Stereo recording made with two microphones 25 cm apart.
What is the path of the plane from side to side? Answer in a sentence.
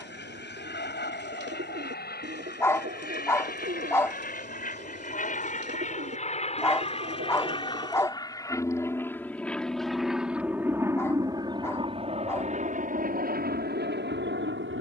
You can hear the plane travel towards the right.